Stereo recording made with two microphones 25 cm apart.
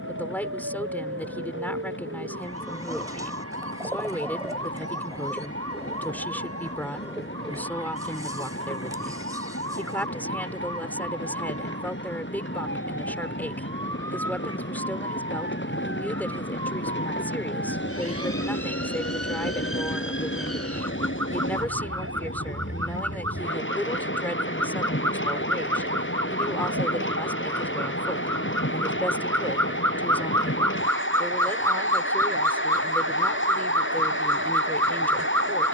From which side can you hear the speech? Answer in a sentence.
You can hear the speech in the centre.